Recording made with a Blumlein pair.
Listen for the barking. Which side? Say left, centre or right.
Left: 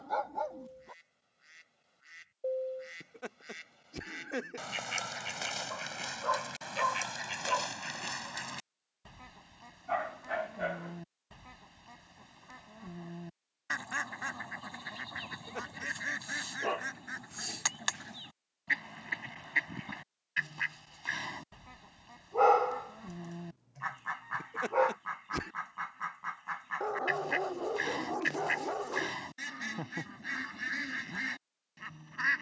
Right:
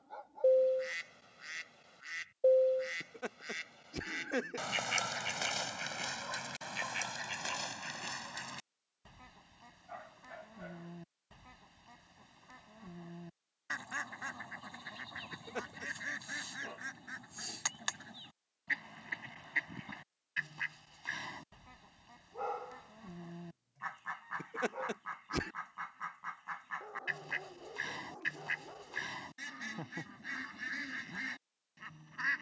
left.